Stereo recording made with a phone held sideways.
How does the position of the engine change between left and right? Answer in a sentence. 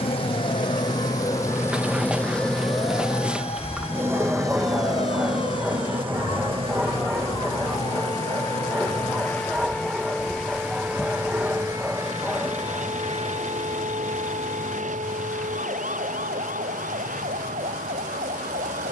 In this clip you hear the engine move from left to right.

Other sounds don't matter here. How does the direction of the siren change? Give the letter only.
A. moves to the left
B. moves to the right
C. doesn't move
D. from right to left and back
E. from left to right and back
B.